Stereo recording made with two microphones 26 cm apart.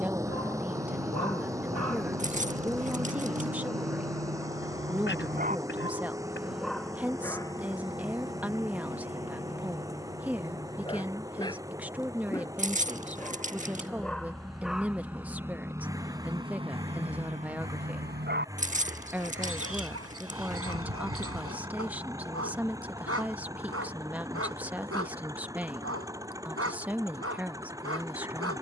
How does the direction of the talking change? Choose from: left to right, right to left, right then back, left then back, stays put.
stays put.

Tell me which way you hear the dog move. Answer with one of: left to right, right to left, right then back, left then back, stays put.
left then back.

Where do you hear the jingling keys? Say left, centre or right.
right.